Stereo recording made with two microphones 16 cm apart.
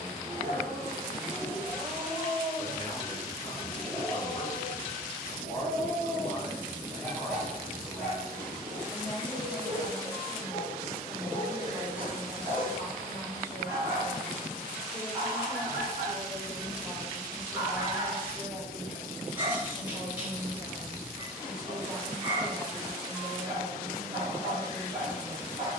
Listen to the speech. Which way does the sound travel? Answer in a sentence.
In this clip you hear the speech move from left to right.